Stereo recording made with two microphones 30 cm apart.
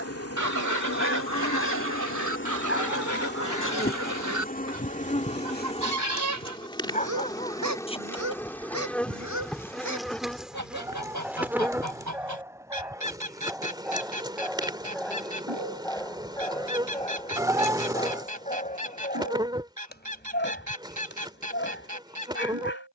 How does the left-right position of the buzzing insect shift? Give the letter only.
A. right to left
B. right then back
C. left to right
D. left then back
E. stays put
C.